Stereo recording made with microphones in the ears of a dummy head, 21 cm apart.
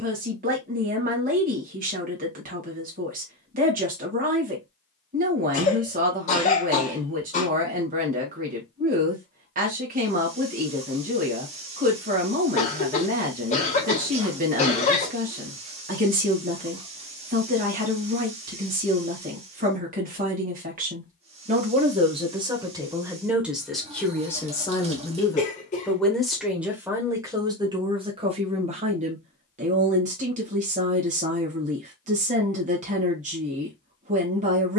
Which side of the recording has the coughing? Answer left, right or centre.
left.